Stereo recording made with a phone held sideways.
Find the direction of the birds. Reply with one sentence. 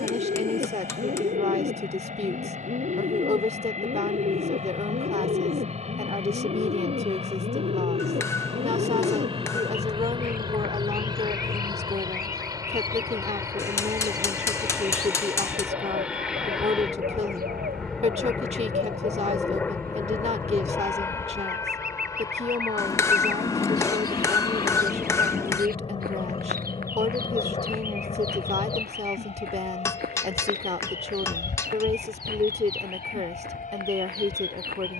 In this clip you hear the birds on the right.